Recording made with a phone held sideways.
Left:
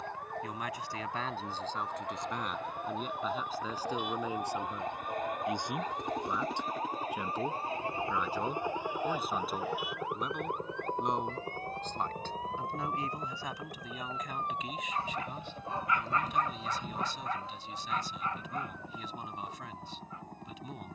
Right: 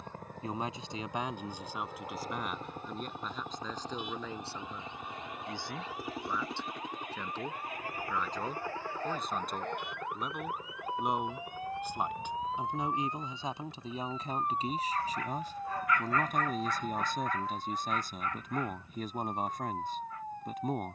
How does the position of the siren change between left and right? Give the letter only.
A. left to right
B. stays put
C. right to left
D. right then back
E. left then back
A.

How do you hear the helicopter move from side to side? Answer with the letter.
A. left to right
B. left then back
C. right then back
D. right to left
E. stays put
D.